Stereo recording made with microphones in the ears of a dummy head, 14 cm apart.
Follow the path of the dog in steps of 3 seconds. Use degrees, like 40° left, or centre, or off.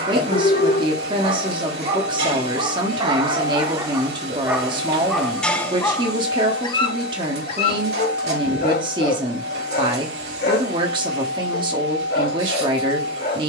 40° right, 10° right, 40° left, 70° left, 80° left.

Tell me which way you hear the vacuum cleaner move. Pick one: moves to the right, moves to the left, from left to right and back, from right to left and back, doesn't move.
doesn't move.